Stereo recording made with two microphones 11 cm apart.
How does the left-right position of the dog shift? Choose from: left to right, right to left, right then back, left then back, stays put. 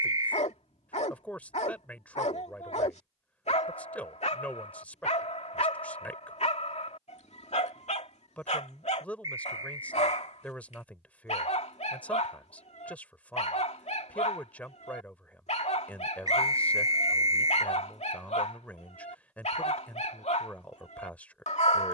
stays put.